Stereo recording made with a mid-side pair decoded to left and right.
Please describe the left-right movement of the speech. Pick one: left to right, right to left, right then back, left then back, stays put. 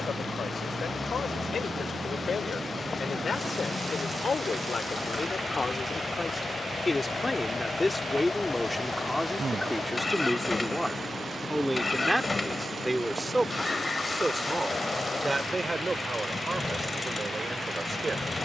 left to right.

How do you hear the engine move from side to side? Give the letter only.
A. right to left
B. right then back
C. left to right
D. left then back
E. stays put
E.